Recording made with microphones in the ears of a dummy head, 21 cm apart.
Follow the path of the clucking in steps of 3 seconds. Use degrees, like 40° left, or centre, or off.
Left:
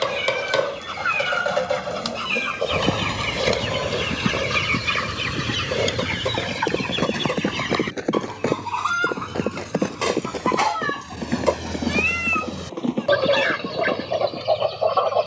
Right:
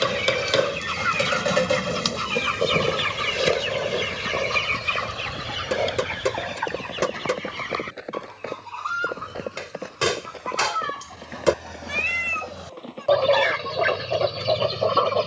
40° right, 20° left, 60° left, 60° left, 10° left.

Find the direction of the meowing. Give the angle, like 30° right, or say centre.
10° left.